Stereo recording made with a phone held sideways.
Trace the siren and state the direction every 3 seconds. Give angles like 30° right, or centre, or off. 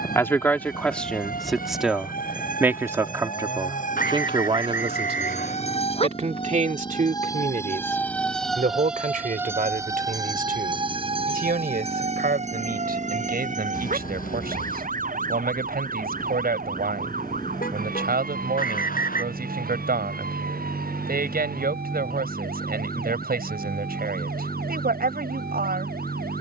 70° left, 50° left, 20° left, 30° right, 50° right, 60° right, 70° right, 70° right, 70° right.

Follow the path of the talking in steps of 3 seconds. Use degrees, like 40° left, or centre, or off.
centre, 30° right, 60° right, 70° right, 80° right, 80° right, 80° right, 80° right, 80° right.